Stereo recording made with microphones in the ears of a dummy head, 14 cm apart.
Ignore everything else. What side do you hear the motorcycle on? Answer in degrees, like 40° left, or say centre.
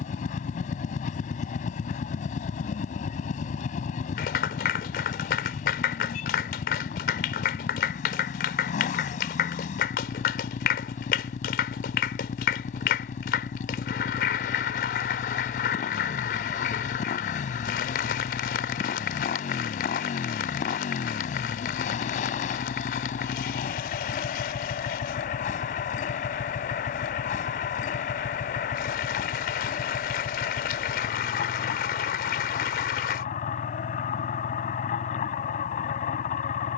50° left.